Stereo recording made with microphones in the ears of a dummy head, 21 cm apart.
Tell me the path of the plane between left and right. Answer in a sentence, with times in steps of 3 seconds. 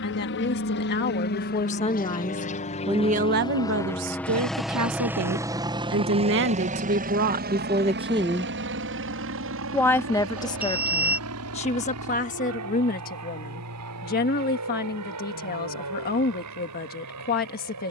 In this clip you hear the plane on the left from 0 s, in the centre from 3 s and on the right from 6 s.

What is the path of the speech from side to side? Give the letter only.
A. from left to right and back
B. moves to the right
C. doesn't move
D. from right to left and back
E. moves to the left
A.